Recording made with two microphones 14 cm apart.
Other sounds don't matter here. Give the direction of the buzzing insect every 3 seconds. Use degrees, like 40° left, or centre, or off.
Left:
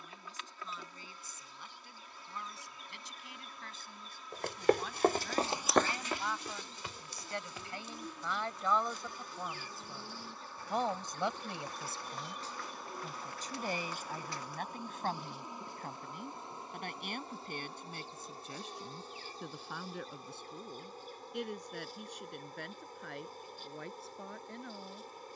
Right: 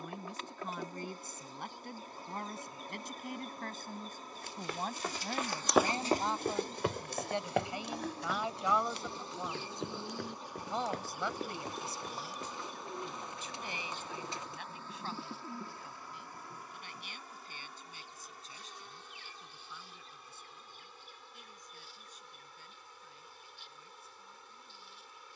40° right, 40° right, 40° right, 20° right, 10° left, 20° left, 40° left, 40° left, 40° left.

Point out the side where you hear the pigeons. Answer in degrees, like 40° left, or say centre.
20° right.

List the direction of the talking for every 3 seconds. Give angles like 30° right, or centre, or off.
60° right, 40° right, 20° right, 10° left, 40° left, 60° left, 60° left, 70° left, 70° left.